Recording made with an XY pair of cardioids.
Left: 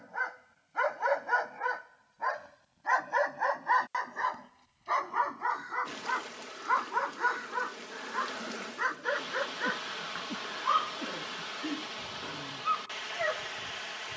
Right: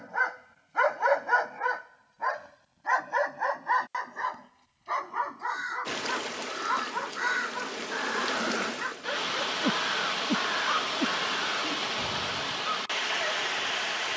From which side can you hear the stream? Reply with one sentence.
In this clip you hear the stream on the right.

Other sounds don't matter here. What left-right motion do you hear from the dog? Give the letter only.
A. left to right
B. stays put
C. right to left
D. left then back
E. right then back
C.